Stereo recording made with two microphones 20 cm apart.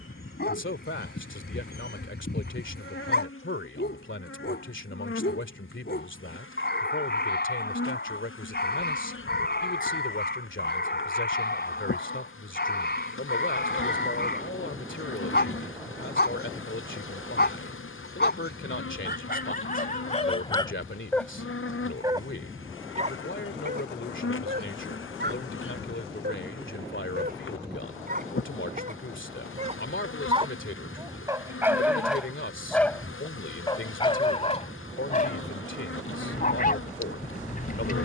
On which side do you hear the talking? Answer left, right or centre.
left.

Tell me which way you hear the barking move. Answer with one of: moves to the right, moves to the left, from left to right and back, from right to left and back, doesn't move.
from left to right and back.